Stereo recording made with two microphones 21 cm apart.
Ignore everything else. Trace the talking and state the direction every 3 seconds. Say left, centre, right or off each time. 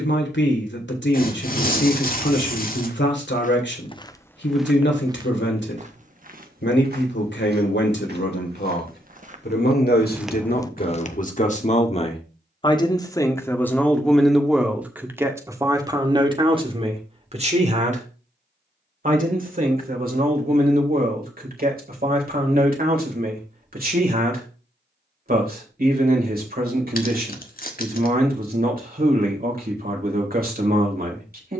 left, left, left, left, centre, right, right, right, right, right, right.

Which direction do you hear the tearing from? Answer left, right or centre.
left.